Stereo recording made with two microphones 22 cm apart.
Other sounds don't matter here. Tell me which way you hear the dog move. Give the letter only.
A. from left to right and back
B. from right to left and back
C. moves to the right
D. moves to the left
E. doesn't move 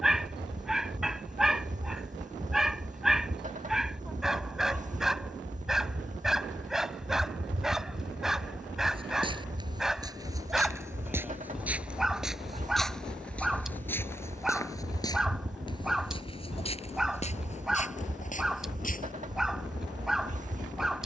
E.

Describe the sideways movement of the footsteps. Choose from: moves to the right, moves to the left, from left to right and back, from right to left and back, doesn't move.
moves to the left.